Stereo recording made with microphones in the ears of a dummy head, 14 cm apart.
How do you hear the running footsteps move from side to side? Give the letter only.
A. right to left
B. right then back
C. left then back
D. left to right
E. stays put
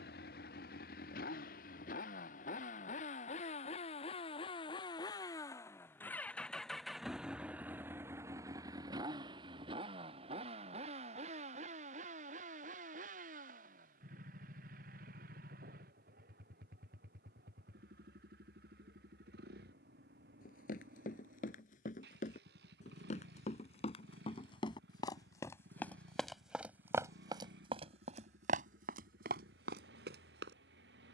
D.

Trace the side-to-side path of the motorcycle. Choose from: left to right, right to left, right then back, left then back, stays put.
left to right.